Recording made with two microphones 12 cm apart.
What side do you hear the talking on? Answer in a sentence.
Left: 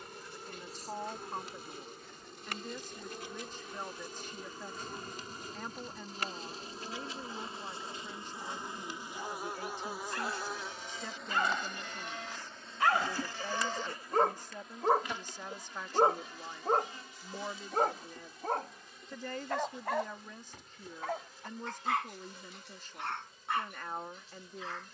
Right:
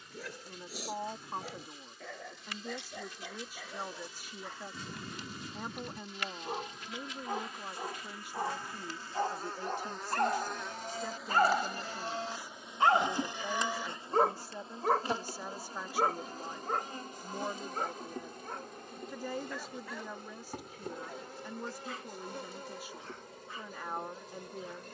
You can hear the talking in the centre.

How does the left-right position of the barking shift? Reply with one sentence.
You can hear the barking move from right to left.